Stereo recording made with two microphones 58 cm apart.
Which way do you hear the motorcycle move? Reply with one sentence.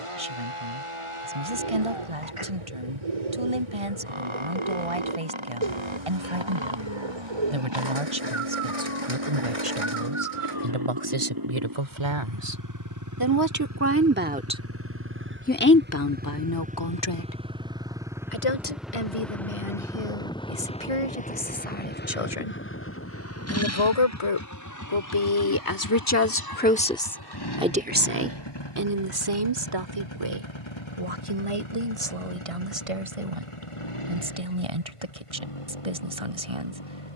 In this clip you hear the motorcycle move to the left.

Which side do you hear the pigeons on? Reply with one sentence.
You can hear the pigeons on the right.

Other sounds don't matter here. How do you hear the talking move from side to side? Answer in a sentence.
You can hear the talking move from right to left and back again.